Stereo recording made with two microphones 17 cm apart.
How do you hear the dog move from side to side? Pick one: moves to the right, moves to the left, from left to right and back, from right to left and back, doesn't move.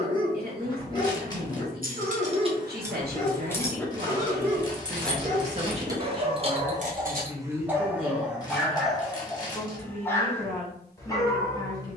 from left to right and back.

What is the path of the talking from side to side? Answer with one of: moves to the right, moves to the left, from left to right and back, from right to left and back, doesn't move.
moves to the left.